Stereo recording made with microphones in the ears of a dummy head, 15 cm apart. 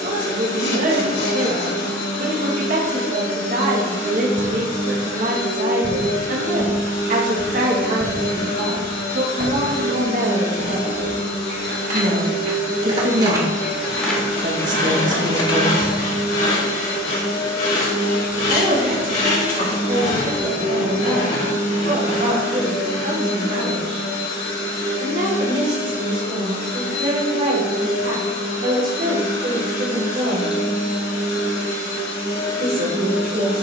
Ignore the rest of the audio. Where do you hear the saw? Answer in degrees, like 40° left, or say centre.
80° left.